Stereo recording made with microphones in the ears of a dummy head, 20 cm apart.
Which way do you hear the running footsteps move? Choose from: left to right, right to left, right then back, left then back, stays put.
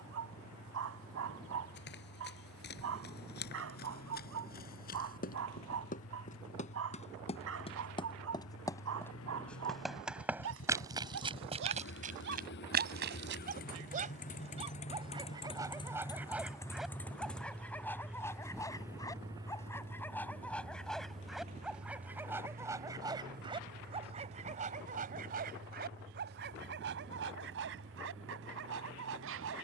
left to right.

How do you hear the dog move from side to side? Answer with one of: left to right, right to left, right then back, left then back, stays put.
left then back.